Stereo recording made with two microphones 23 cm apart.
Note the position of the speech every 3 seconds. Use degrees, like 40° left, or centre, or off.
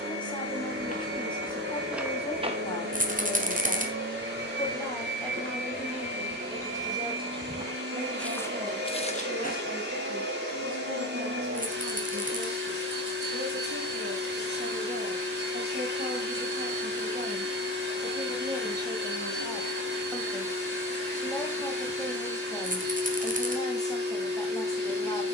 20° left, 10° left, 20° right, 60° right, 50° right, 40° right, 10° right, 10° left, 20° left.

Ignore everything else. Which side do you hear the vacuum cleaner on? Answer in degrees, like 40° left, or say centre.
50° right.